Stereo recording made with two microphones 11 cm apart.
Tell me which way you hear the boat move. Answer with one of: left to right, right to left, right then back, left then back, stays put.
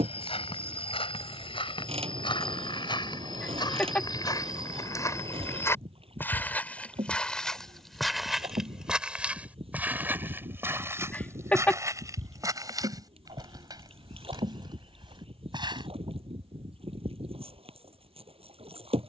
stays put.